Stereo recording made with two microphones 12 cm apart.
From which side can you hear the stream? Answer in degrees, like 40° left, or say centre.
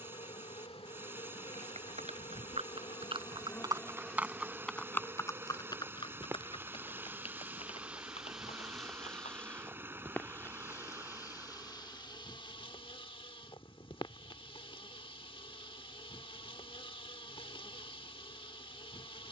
20° right.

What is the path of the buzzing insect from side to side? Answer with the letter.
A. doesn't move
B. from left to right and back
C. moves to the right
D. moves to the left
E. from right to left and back
B.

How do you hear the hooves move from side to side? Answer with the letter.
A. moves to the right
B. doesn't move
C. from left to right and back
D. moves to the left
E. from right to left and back
D.